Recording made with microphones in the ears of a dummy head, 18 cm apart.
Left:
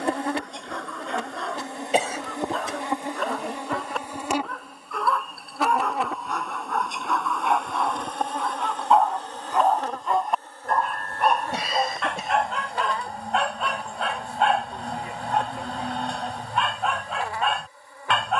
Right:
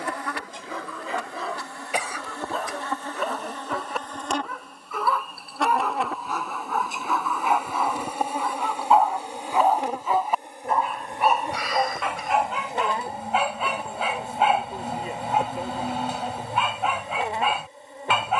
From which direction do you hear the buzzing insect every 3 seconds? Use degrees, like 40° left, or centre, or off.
20° left, 10° left, 10° right, 20° right, 20° right, 20° right.